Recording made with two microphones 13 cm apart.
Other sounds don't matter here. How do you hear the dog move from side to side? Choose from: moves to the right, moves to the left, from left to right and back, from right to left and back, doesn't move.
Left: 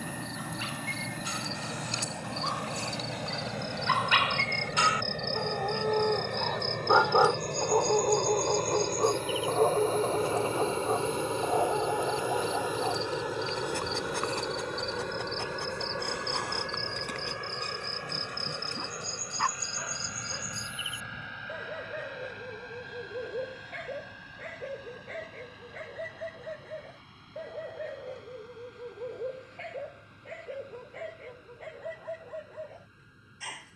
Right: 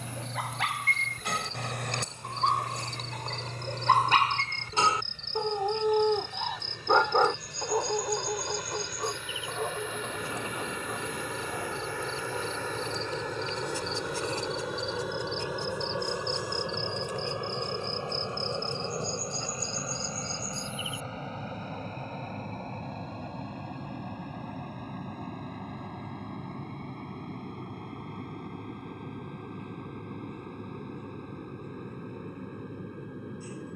moves to the left.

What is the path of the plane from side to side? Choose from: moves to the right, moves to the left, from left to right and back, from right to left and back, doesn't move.
moves to the right.